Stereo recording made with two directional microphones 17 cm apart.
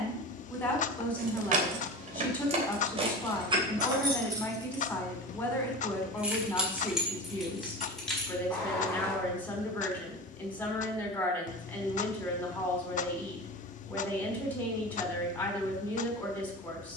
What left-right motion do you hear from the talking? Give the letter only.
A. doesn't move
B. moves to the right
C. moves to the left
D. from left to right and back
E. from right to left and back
A.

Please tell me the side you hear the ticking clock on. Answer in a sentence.
You can hear the ticking clock on the left.